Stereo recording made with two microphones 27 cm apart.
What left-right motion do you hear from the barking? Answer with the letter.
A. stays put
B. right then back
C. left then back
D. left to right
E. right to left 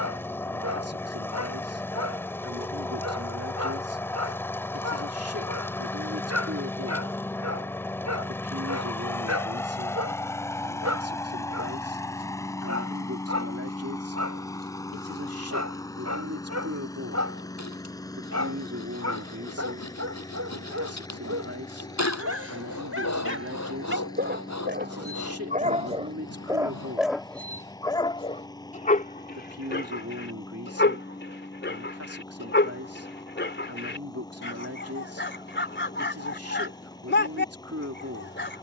E.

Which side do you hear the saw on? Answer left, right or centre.
left.